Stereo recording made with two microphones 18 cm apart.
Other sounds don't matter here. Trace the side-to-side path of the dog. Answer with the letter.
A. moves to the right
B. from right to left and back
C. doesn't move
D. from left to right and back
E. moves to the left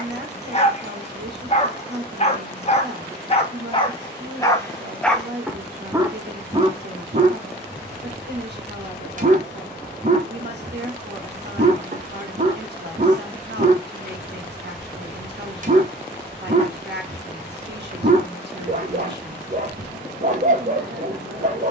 A.